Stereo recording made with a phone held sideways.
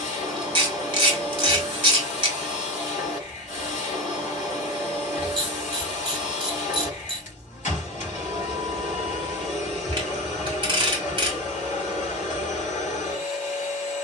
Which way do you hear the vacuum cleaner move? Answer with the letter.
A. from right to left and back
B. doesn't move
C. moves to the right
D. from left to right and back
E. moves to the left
B.